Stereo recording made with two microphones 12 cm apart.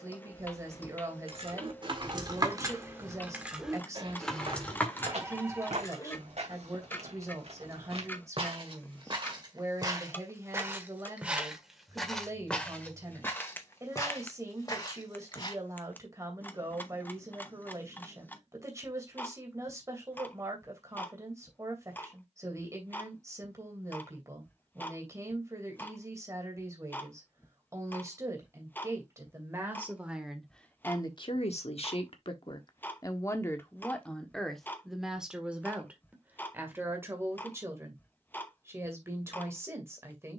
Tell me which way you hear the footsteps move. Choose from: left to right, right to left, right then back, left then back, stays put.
right then back.